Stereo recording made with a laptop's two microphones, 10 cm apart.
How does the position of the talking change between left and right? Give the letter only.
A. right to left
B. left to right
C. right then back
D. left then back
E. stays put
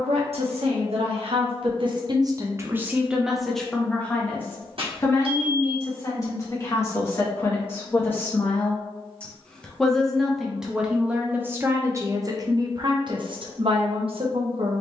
D.